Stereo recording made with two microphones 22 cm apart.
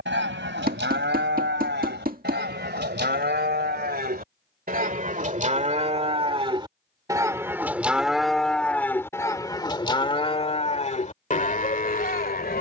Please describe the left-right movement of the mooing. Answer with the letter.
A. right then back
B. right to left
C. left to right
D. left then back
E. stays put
B.